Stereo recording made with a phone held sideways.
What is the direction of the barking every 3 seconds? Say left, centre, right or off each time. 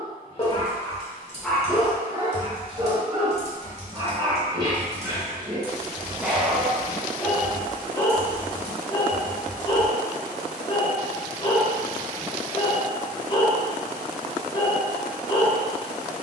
centre, right, centre, left, left, left.